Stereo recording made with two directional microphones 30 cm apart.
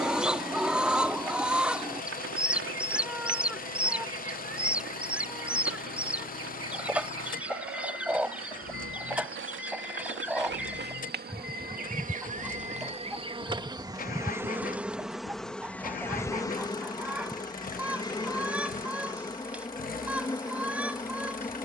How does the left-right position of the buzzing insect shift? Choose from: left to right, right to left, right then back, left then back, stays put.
right to left.